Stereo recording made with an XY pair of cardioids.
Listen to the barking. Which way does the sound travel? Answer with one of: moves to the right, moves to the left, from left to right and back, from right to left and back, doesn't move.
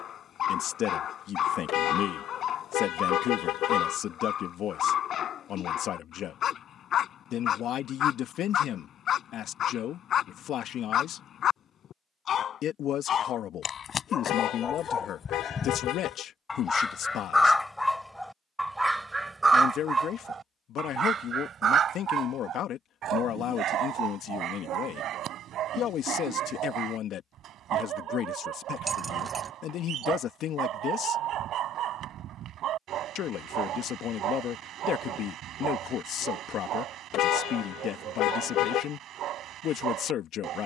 moves to the right.